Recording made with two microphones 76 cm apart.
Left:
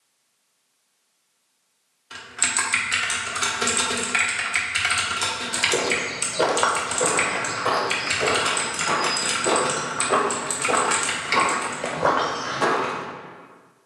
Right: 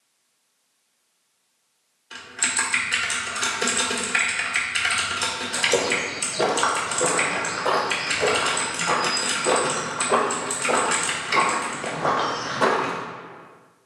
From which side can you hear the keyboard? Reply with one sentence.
In this clip you hear the keyboard on the left.